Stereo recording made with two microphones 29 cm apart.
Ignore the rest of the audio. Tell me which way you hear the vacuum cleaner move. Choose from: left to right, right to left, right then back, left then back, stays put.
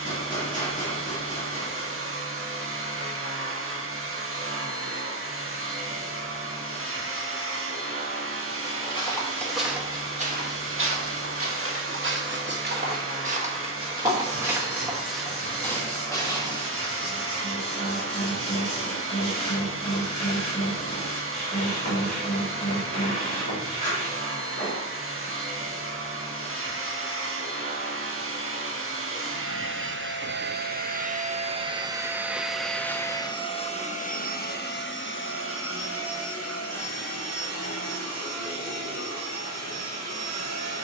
right to left.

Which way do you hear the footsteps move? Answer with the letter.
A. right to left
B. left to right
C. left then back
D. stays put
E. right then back
E.